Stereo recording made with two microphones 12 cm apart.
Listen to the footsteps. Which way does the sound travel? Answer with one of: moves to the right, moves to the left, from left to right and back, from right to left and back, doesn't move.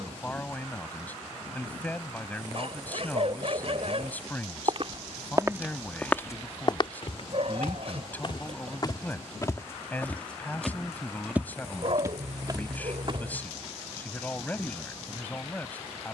from right to left and back.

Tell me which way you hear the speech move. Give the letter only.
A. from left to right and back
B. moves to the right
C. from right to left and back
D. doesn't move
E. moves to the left
D.